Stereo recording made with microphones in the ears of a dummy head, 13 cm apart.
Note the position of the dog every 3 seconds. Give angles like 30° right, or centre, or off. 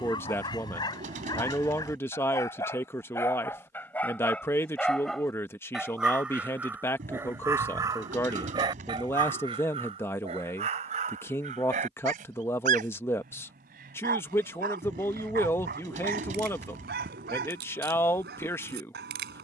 30° left, 10° left, 20° right, 50° right, 70° right, 80° right, 80° right.